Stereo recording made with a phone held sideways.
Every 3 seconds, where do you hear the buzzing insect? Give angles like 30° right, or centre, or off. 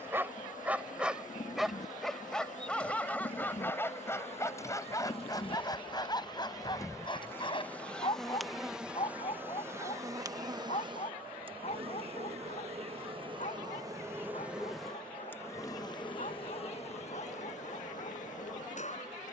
60° left, 40° left, 10° left, 20° right, 30° right, 40° left, 60° left.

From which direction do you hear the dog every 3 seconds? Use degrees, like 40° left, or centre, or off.
centre, 20° left, 30° left, 40° left, 50° left, 50° left, 50° left.